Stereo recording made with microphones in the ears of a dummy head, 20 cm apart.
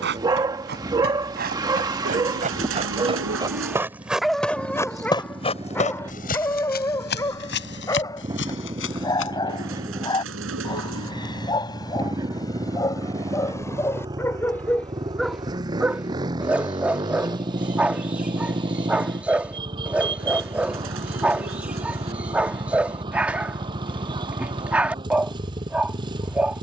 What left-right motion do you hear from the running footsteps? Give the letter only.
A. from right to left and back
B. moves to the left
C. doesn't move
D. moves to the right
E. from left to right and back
B.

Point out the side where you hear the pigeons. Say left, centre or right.
right.